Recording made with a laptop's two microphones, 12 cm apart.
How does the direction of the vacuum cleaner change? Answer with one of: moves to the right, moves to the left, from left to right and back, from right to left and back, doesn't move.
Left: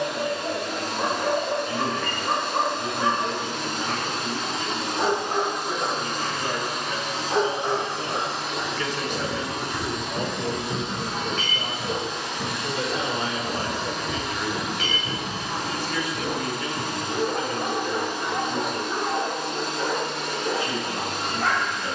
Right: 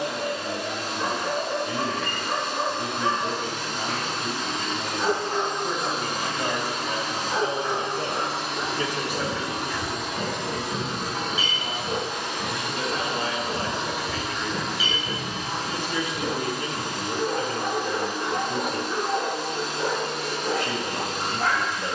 from left to right and back.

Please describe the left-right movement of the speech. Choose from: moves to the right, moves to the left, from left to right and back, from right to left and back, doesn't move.
from right to left and back.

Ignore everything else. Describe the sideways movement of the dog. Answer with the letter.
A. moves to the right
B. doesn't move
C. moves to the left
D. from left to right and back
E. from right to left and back
A.